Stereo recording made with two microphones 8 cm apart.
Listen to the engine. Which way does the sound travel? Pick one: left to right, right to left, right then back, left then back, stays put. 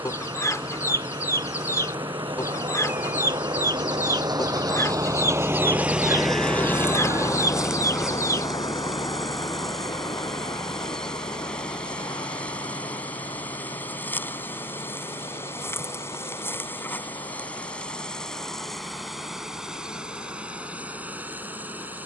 right to left.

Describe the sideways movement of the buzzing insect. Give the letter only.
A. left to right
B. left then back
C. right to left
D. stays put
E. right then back
B.